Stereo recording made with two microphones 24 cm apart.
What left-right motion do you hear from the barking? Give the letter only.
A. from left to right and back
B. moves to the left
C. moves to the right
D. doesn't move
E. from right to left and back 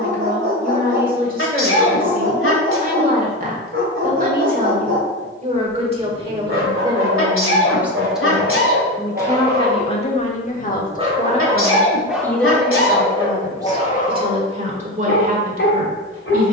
B.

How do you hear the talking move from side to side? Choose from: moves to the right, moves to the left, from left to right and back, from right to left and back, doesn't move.
from right to left and back.